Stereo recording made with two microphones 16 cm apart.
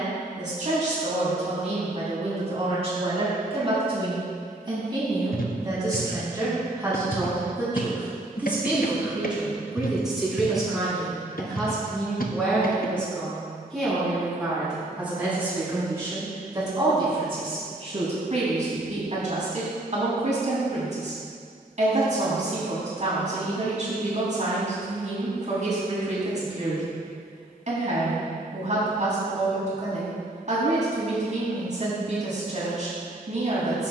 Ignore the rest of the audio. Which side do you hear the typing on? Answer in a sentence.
In this clip you hear the typing on the left.